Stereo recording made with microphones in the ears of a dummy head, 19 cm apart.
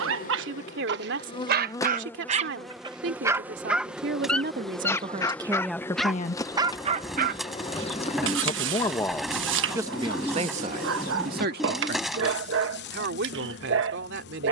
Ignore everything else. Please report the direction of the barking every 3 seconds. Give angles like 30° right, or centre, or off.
50° right, centre, 50° right, 70° right, 70° right.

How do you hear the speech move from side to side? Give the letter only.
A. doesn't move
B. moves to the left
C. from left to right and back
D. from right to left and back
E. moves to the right
D.